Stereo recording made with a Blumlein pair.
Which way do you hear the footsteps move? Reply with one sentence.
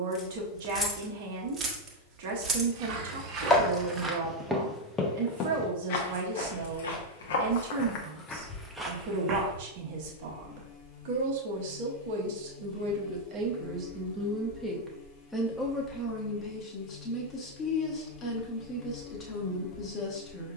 In this clip you hear the footsteps move from right to left and back again.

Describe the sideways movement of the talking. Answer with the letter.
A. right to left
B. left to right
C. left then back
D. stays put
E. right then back
A.